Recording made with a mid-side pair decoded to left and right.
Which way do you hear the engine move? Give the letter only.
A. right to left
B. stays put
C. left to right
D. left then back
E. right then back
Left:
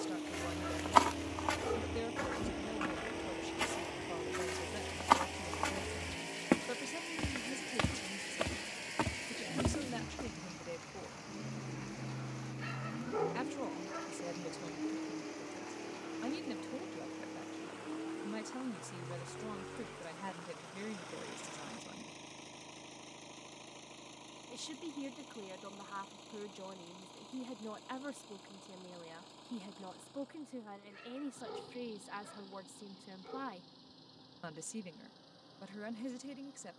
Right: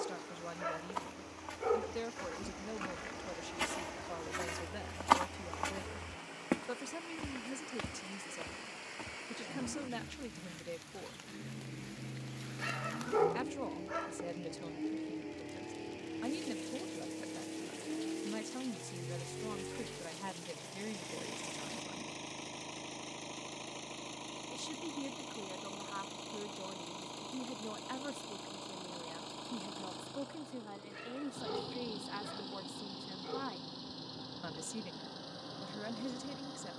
C.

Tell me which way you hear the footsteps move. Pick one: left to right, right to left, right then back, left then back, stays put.
right then back.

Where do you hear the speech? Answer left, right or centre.
centre.